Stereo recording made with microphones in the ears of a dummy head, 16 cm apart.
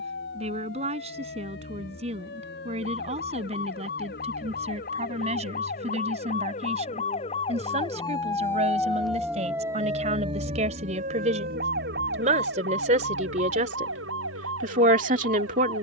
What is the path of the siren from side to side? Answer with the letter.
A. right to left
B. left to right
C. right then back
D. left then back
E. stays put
B.